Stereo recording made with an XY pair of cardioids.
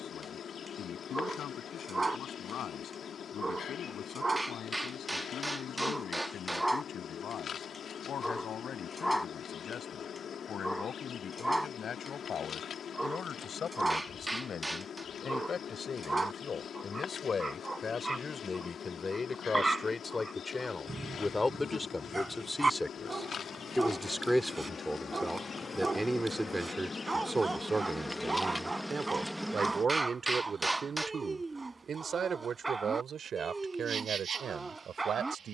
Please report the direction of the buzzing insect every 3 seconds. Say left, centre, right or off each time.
left, left, left, left, left, left, left, left, left, centre, right, right.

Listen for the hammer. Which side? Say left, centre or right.
centre.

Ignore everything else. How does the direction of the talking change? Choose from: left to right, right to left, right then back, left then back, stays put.
left to right.